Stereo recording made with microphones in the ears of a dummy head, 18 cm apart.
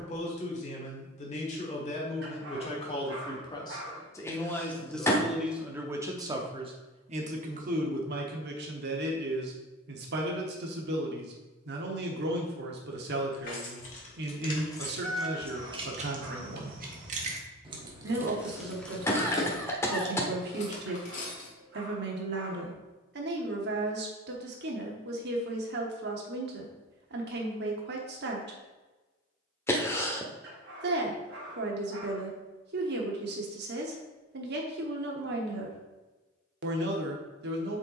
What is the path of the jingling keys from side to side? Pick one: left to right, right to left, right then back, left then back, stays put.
right then back.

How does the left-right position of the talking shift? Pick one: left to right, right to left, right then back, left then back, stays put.
left to right.